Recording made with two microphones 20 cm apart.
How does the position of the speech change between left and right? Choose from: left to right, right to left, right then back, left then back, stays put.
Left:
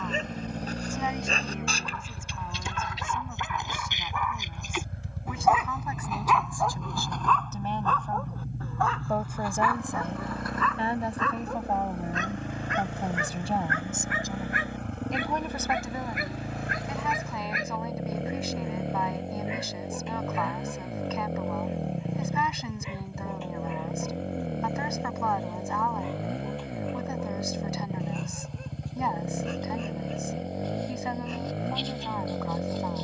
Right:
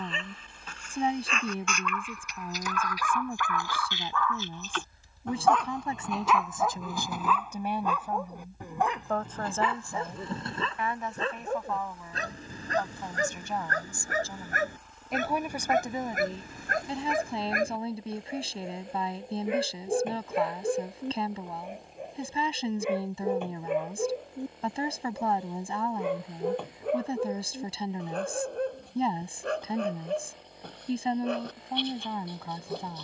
left then back.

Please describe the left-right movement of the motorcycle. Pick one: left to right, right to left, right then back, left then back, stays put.
stays put.